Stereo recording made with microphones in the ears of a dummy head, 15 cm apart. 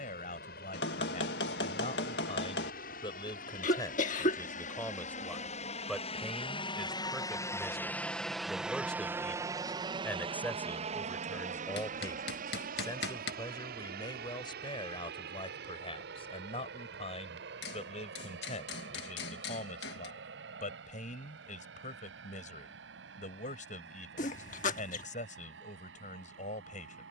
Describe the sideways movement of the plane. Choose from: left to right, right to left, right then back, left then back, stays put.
left to right.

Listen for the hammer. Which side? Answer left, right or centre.
left.